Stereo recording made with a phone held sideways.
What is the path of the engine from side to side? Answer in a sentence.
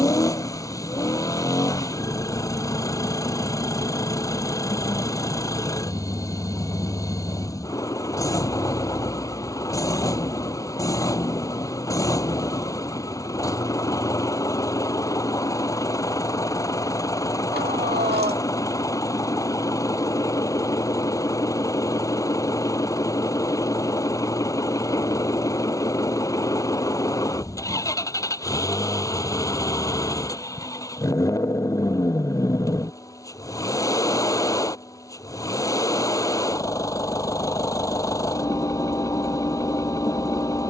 In this clip you hear the engine stay put.